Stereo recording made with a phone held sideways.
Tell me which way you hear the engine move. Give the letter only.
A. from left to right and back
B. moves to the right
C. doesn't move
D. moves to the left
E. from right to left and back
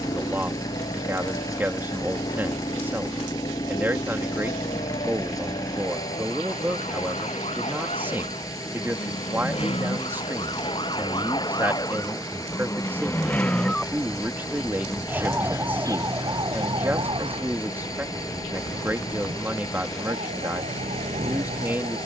C.